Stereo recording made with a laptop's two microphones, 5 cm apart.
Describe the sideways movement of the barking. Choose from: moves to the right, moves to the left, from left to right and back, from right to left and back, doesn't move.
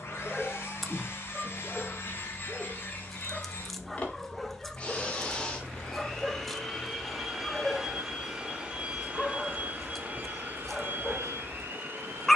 doesn't move.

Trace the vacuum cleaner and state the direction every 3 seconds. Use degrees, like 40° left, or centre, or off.
40° left, 30° left, centre, 40° right.